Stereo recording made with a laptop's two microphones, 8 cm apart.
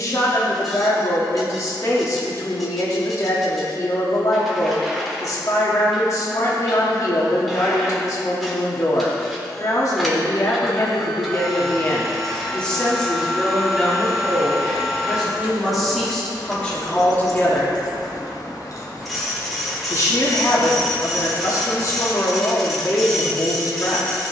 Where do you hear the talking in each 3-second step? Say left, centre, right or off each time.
left, left, left, left, centre, centre, left, left.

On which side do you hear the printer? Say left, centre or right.
centre.